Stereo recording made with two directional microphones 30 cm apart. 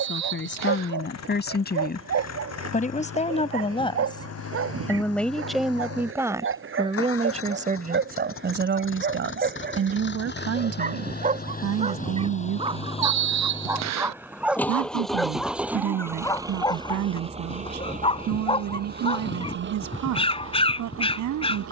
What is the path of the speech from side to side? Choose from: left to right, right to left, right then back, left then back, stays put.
left to right.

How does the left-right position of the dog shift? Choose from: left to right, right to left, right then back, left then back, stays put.
right to left.